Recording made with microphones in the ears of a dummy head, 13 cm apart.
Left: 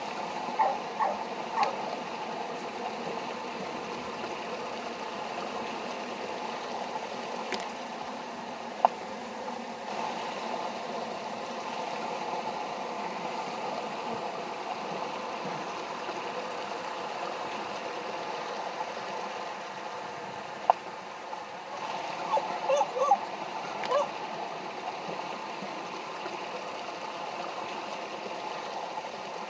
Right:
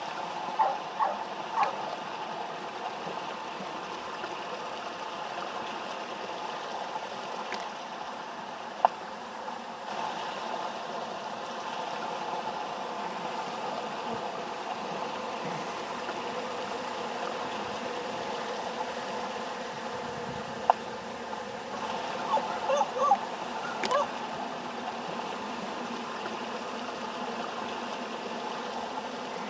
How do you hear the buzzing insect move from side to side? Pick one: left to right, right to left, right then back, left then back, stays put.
left to right.